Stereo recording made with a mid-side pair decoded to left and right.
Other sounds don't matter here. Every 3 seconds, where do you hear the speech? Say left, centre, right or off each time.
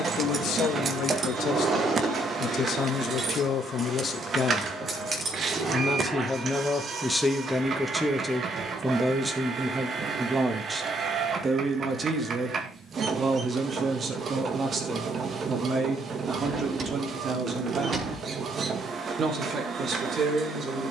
left, left, centre, right, right, right, right.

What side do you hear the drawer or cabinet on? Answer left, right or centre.
right.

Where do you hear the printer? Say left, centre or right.
right.